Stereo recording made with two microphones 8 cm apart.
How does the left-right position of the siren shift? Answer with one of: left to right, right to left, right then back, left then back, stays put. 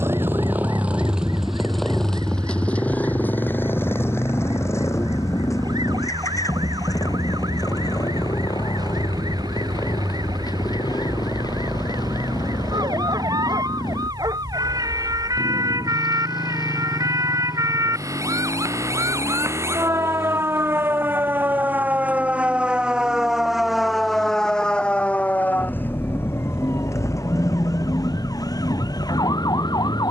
right to left.